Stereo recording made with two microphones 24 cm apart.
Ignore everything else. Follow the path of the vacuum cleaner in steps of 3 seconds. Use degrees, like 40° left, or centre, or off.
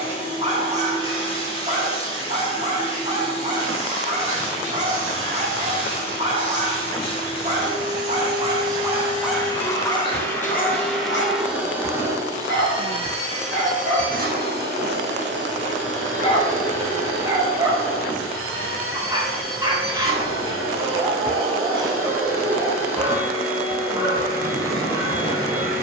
20° left, 20° left, 20° left, 10° left, 30° right, 50° right, 60° right, 60° right, 60° right.